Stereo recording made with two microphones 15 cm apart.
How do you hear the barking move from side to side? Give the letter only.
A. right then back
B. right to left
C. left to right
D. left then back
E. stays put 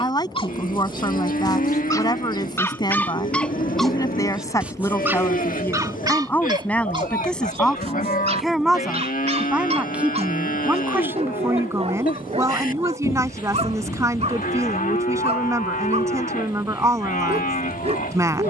C.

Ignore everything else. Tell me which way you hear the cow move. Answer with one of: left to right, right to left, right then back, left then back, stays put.
stays put.